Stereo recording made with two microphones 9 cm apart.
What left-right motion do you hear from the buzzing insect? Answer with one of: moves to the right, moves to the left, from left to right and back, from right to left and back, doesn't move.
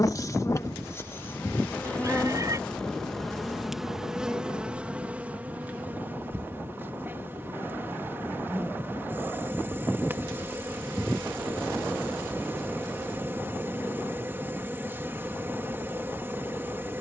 moves to the right.